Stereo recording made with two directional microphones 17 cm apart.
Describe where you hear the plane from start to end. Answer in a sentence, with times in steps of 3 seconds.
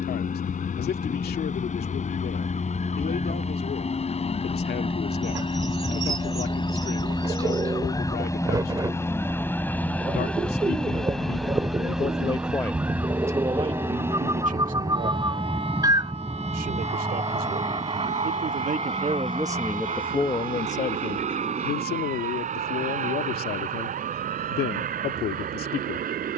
You can hear the plane on the left from 0 s, in the centre from 9 s and on the right from 15 s.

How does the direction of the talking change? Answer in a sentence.
You can hear the talking move from left to right and back again.